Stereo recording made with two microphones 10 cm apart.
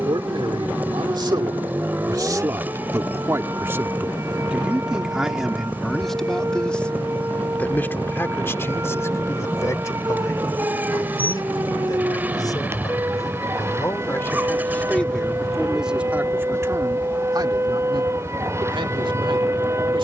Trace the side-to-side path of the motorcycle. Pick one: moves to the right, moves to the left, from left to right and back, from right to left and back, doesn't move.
doesn't move.